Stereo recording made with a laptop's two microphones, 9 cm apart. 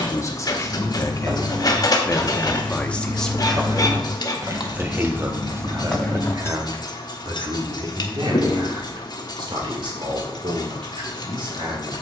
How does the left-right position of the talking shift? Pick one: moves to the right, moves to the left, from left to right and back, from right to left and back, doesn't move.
moves to the right.